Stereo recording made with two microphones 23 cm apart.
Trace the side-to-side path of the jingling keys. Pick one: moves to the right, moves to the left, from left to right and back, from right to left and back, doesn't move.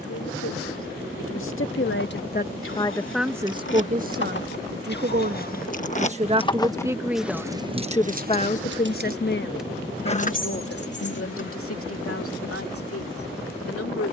from left to right and back.